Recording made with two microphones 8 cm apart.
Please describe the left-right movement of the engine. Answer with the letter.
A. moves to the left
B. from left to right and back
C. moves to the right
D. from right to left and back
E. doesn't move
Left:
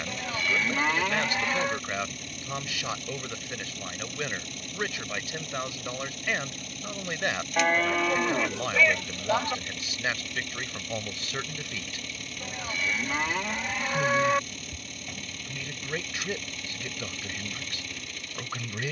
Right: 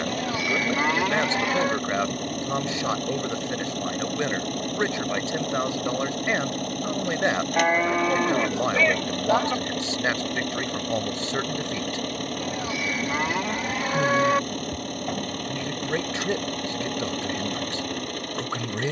E.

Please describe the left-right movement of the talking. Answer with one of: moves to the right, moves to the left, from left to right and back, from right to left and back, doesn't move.
doesn't move.